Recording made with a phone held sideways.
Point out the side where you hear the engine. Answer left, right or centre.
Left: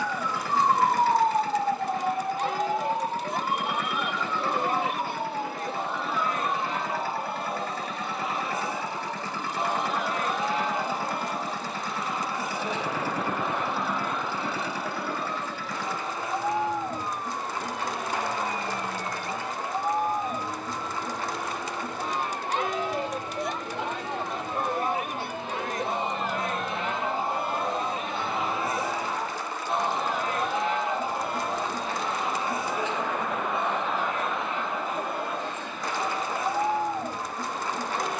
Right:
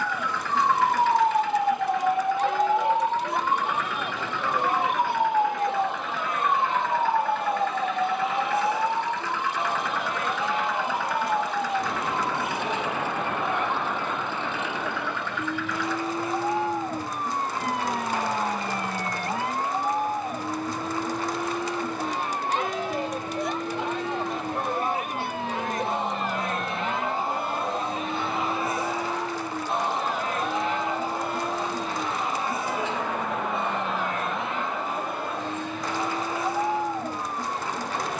left.